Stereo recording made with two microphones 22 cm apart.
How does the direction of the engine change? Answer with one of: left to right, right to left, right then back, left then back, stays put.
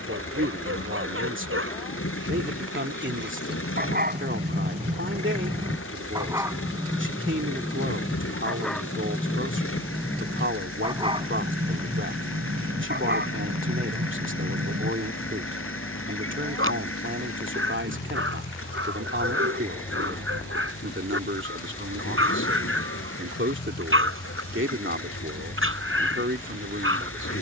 stays put.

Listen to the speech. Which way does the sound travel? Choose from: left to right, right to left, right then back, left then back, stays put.
stays put.